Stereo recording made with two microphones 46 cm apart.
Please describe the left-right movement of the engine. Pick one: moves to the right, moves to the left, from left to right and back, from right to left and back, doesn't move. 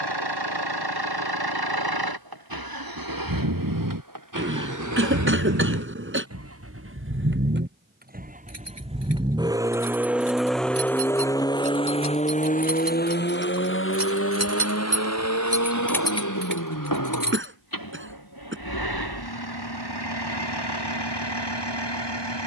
moves to the left.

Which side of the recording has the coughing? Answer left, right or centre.
right.